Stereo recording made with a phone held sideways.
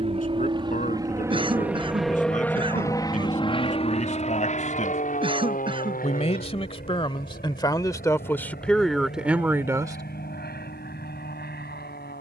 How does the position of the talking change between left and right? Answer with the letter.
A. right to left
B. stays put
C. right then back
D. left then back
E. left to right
E.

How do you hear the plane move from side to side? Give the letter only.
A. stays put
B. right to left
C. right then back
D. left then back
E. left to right
B.